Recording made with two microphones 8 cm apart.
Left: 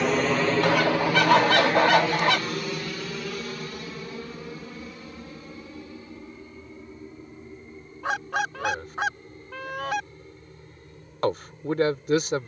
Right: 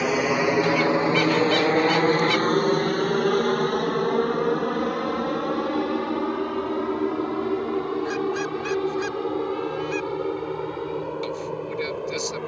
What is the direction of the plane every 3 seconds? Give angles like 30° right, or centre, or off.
30° right, 50° right, 60° right, 70° right.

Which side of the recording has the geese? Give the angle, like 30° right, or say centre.
60° left.